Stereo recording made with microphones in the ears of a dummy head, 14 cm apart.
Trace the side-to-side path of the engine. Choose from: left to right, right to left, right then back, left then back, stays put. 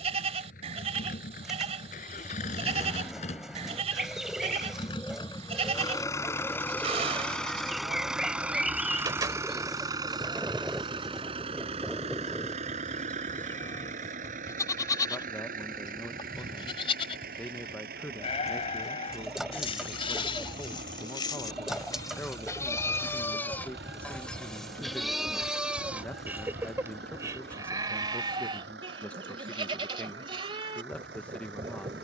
left to right.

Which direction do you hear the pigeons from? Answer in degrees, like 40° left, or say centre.
centre.